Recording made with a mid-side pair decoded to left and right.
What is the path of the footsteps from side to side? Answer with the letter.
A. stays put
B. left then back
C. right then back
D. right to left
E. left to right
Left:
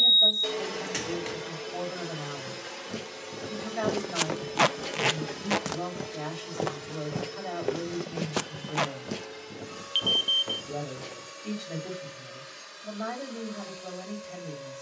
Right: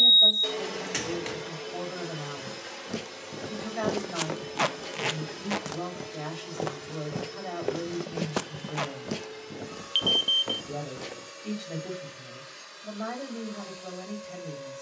B.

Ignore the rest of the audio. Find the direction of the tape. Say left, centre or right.
left.